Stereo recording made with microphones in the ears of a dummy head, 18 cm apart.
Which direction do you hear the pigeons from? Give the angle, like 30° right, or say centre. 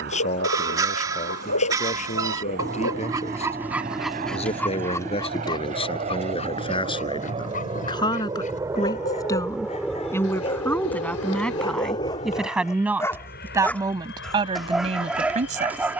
80° left.